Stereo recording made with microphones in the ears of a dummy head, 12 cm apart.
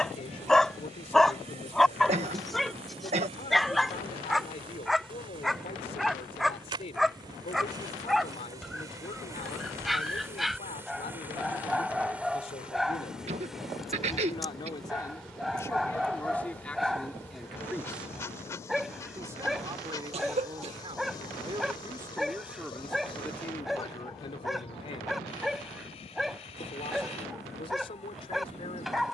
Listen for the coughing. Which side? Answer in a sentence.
You can hear the coughing on the right.